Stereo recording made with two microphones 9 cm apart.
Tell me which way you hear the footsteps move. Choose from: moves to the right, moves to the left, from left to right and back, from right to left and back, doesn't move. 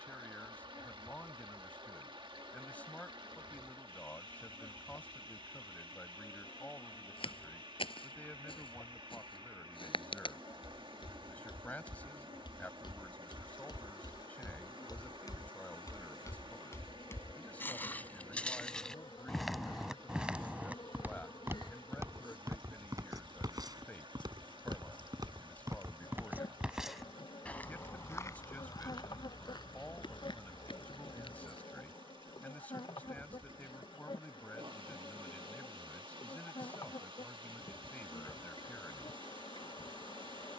from left to right and back.